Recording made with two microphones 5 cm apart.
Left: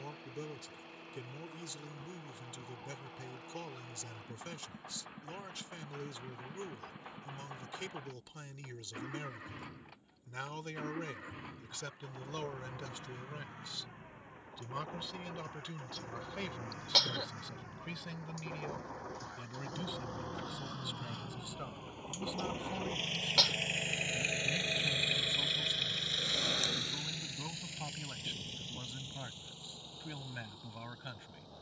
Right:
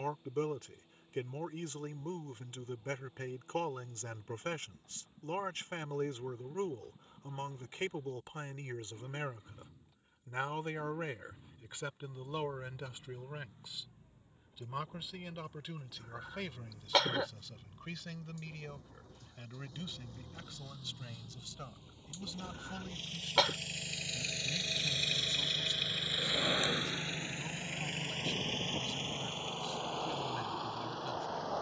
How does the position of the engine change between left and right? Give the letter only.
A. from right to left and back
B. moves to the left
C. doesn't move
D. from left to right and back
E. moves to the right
E.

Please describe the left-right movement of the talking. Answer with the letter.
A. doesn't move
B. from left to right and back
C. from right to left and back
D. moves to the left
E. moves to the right
D.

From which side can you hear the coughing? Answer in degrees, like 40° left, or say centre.
30° right.